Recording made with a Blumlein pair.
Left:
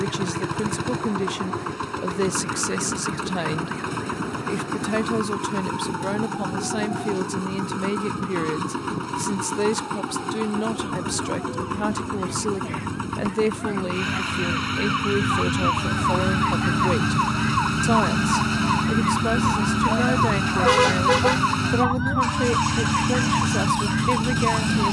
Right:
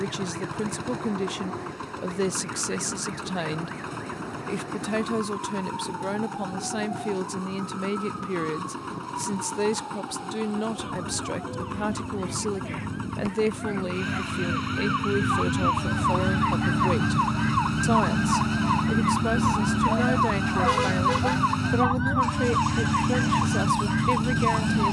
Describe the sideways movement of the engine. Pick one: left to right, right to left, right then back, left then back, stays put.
stays put.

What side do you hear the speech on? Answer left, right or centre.
centre.